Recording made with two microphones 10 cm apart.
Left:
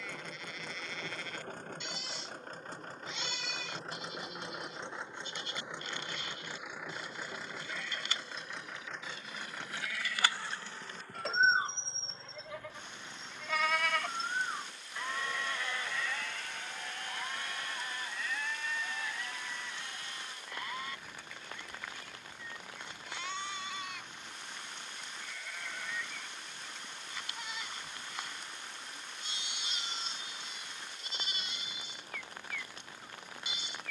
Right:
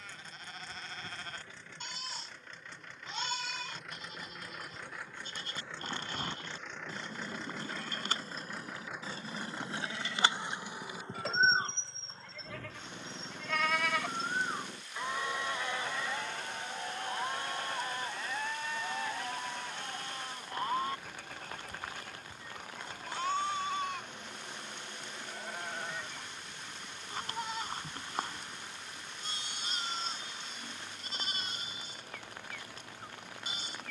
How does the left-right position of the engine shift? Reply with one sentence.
You can hear the engine move to the right.